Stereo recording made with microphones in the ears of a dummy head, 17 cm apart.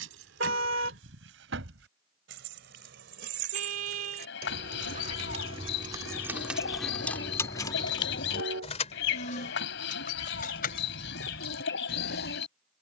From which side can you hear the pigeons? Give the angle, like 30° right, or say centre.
70° left.